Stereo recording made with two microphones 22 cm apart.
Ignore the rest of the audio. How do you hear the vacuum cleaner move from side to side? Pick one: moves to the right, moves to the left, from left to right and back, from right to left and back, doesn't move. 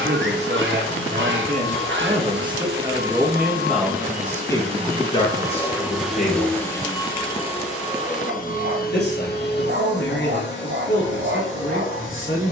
moves to the left.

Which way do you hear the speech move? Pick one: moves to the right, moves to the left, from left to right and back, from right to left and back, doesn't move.
moves to the left.